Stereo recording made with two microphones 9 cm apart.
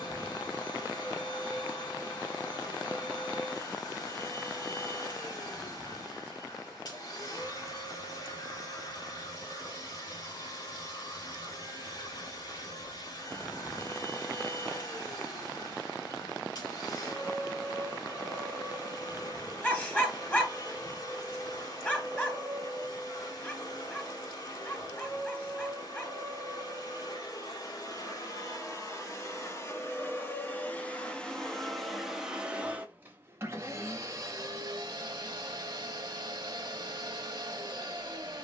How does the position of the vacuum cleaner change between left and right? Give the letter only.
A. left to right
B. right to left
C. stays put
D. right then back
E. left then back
A.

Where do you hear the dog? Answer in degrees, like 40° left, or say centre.
20° left.